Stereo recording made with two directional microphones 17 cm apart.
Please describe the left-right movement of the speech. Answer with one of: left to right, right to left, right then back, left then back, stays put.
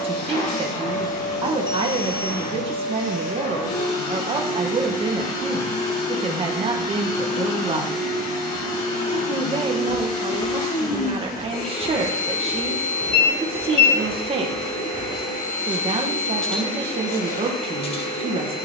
stays put.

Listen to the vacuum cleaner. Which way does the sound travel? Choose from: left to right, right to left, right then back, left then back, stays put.
stays put.